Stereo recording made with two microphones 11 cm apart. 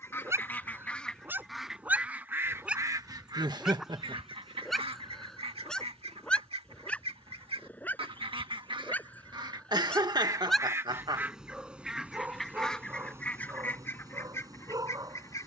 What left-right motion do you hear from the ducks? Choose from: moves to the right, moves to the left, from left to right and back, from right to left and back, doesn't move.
from left to right and back.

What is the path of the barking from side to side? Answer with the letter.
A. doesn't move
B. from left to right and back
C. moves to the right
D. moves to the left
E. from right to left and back
E.